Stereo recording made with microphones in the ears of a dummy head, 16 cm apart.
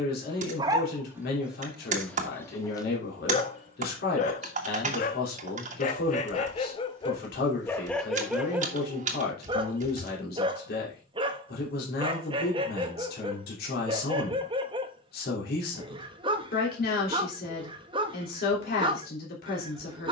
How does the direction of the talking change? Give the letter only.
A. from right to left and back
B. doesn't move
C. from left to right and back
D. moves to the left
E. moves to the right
B.